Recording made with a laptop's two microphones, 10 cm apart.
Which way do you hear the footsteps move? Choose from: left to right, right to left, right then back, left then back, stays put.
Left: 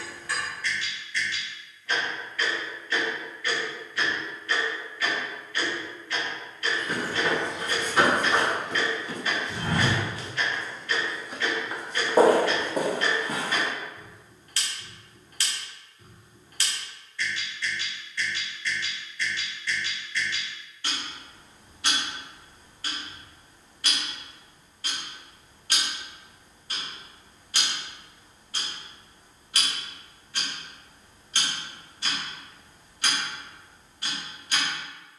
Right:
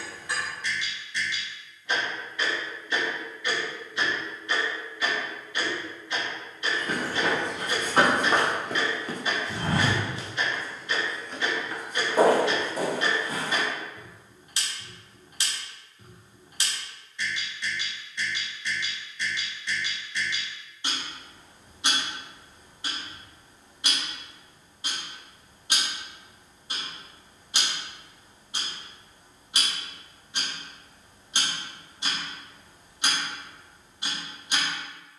right to left.